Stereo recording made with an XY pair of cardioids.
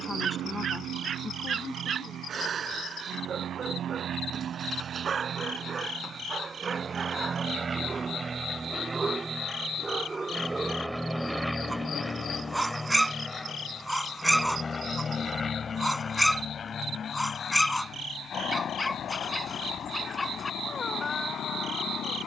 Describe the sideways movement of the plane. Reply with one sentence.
You can hear the plane move to the left.